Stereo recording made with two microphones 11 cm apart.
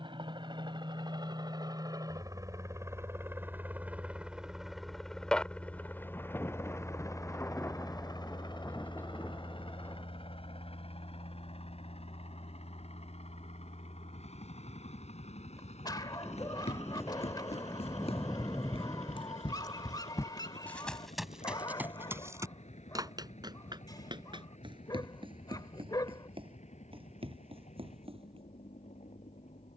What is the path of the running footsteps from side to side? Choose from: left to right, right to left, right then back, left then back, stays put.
left to right.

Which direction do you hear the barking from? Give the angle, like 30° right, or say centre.
40° left.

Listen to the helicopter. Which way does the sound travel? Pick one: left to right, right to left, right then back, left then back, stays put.
right to left.